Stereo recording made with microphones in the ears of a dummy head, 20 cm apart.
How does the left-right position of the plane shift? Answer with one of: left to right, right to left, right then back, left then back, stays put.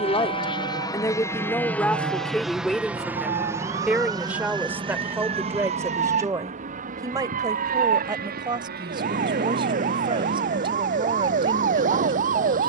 left to right.